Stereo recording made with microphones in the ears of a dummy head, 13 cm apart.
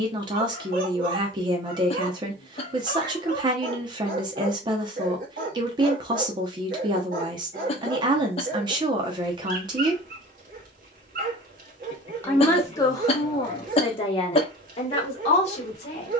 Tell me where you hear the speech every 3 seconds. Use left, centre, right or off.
right, right, right, right, left, left.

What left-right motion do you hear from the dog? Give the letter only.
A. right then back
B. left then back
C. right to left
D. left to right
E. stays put
E.